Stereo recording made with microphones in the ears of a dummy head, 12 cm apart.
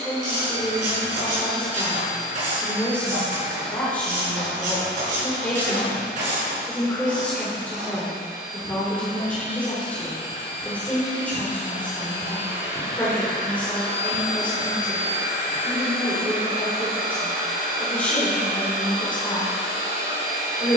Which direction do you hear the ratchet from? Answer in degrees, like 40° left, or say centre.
60° right.